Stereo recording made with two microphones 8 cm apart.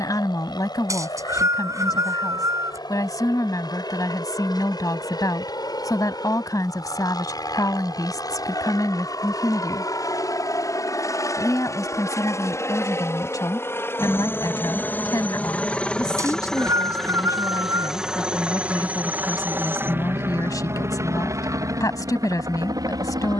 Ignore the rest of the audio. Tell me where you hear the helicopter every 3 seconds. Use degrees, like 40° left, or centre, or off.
70° left, 60° left, 60° left, 50° left, 30° left, 10° left, 20° right, 50° right.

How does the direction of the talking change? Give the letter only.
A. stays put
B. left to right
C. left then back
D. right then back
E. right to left
A.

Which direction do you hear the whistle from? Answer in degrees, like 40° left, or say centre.
40° right.